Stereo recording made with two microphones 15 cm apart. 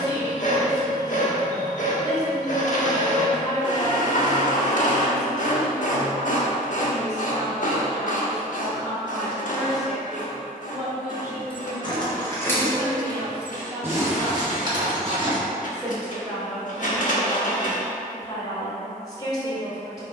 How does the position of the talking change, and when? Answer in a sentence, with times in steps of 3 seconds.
You can hear the talking on the left from 0 s, in the centre from 9 s, on the right from 12 s, in the centre from 15 s and on the left from 18 s.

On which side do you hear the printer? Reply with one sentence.
You can hear the printer on the left.